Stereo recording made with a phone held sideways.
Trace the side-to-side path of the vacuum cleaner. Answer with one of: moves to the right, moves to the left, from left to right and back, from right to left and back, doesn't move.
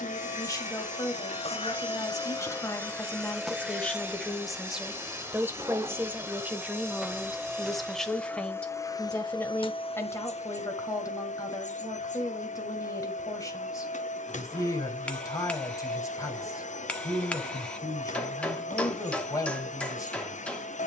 from left to right and back.